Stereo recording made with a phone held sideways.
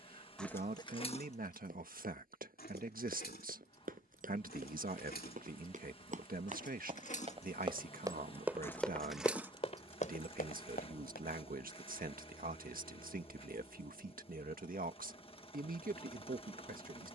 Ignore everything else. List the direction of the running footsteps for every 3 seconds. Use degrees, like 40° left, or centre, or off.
60° right, 60° right, 30° right, 50° left, off, off.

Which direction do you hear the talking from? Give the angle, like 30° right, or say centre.
60° right.